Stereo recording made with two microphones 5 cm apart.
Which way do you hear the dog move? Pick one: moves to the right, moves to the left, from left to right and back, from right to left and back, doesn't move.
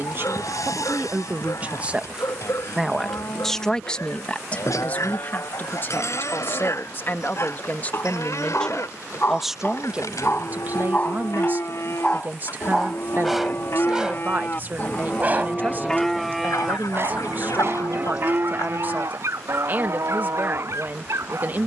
moves to the right.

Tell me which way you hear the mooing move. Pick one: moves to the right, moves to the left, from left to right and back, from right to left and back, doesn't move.
moves to the right.